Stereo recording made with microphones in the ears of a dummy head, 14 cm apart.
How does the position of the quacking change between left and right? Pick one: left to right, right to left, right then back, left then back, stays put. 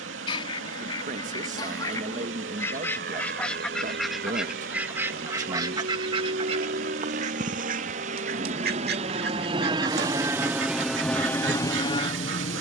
left to right.